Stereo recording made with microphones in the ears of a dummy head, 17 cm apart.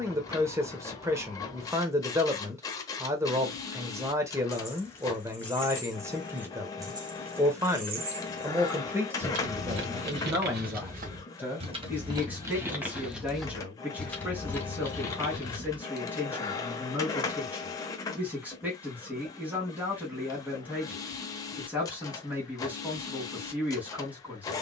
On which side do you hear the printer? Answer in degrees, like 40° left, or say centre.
20° left.